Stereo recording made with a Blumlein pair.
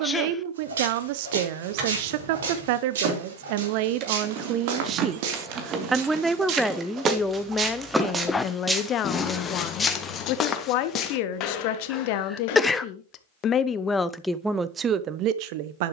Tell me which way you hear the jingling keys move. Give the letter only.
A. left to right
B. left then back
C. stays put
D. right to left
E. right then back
D.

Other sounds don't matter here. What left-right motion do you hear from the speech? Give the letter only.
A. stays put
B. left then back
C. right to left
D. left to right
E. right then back
B.